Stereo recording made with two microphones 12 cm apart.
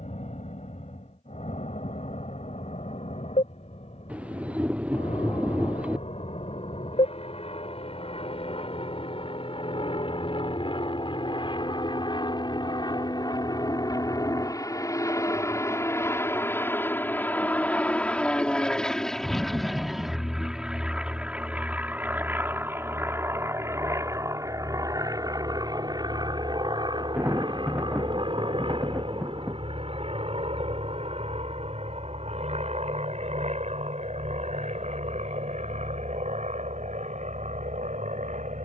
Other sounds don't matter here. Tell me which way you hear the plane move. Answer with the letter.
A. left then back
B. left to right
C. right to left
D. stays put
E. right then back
B.